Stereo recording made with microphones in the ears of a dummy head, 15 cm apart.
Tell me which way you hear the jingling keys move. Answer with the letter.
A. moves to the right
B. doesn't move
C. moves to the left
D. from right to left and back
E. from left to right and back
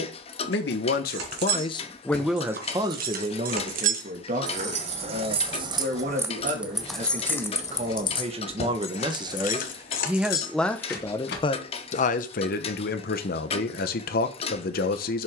C.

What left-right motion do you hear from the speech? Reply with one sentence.
You can hear the speech move from left to right and back again.